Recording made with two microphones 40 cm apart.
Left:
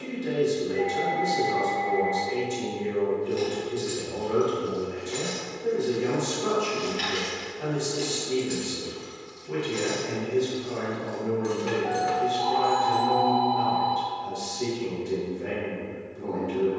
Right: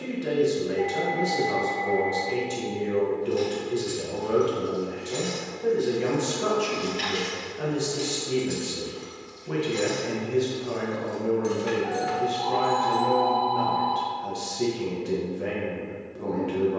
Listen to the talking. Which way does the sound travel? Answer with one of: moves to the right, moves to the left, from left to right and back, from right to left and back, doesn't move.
doesn't move.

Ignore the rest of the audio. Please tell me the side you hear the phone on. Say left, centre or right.
right.